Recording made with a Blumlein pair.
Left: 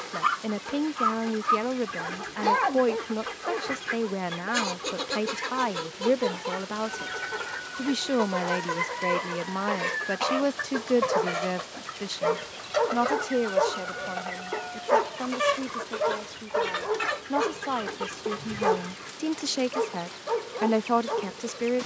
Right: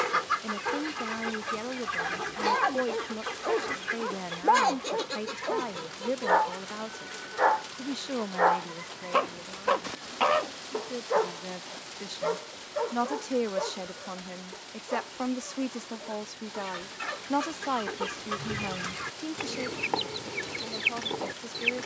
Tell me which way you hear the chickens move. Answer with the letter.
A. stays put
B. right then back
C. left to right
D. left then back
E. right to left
D.